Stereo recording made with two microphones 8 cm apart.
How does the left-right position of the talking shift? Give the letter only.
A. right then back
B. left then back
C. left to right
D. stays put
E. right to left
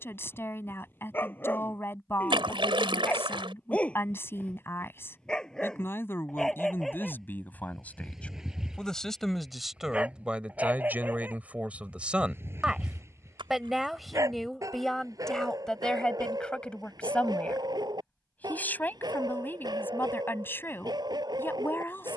A.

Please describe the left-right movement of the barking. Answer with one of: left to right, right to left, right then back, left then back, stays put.
left to right.